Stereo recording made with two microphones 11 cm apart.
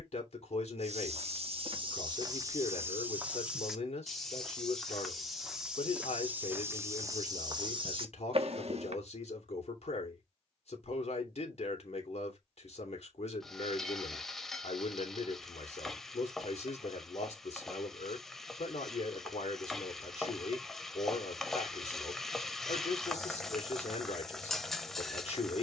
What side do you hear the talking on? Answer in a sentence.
In this clip you hear the talking on the left.